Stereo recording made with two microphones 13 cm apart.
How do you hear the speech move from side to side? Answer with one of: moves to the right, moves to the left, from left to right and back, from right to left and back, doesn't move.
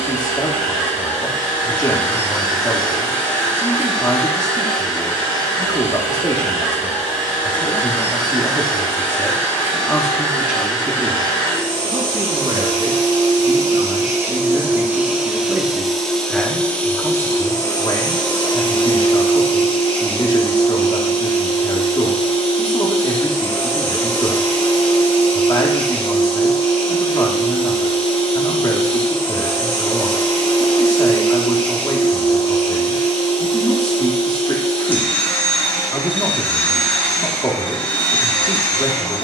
from left to right and back.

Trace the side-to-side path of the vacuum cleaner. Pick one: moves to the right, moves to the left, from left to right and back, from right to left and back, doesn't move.
moves to the left.